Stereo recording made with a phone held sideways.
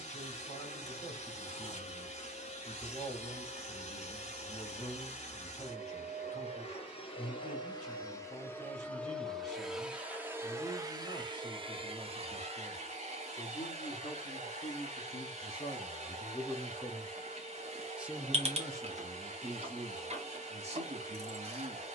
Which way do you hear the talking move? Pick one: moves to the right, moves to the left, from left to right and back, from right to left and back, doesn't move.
moves to the right.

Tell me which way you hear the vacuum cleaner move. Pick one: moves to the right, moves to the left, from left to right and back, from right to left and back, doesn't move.
moves to the right.